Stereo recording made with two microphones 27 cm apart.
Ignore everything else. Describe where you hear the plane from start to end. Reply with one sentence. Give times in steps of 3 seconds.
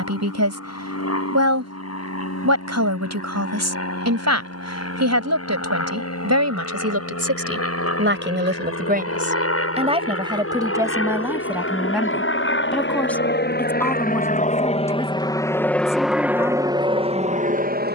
In this clip you hear the plane on the left from 0 s and in the centre from 15 s.